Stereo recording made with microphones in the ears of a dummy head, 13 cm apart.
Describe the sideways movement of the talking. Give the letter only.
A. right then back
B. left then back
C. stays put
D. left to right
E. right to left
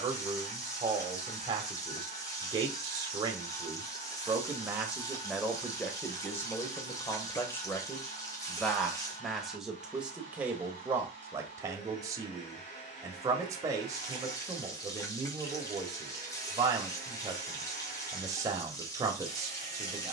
B.